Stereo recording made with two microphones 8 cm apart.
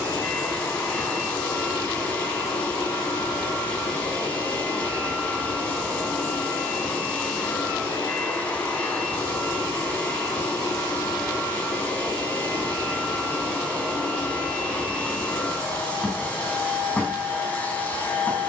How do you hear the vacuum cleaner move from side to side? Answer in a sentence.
You can hear the vacuum cleaner stay in one place.